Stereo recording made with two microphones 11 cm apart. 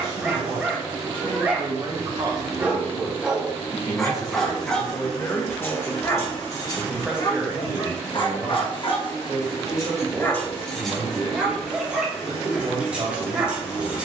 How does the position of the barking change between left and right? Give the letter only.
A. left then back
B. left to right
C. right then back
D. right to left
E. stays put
A.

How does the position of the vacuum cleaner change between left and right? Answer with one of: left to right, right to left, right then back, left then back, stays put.
right to left.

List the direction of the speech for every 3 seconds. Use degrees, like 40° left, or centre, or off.
40° right, 20° left, 10° right, 40° right, 50° right.